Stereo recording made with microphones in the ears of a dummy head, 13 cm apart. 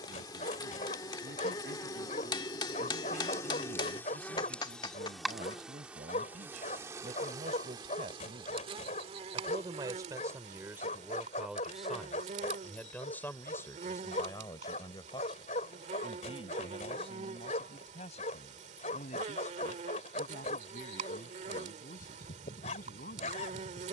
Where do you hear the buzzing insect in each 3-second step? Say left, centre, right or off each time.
left, centre, right, right, right, right, right, right.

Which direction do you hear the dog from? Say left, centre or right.
left.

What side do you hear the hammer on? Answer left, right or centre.
left.